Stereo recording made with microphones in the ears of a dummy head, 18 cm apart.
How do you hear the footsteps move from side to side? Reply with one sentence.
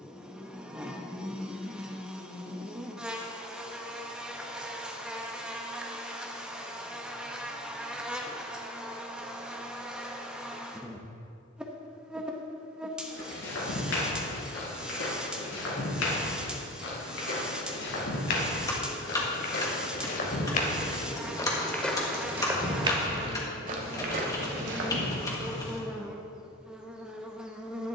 In this clip you hear the footsteps go from the left side to the right.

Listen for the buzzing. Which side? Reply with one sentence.
In this clip you hear the buzzing in the centre.